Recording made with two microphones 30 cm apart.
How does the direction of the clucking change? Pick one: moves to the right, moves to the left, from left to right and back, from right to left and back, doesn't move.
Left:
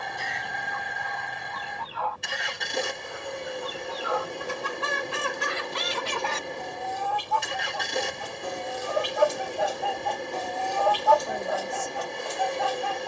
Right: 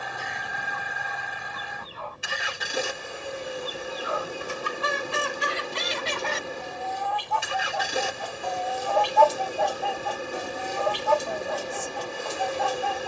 moves to the right.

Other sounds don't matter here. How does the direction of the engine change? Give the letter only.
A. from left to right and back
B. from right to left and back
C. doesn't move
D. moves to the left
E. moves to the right
C.